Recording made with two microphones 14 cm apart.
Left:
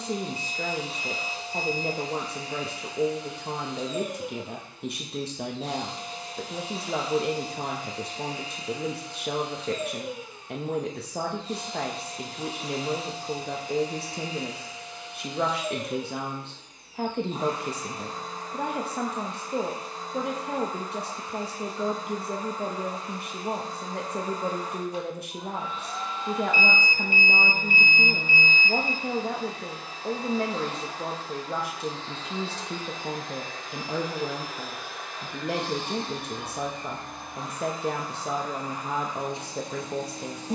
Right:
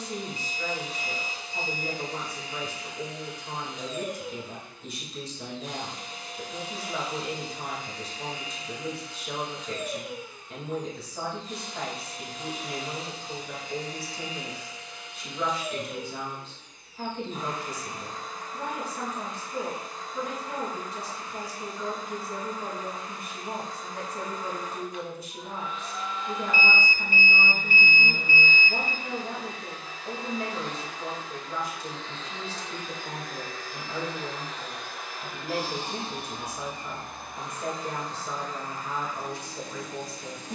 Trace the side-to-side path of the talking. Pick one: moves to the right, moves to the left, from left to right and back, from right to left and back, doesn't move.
doesn't move.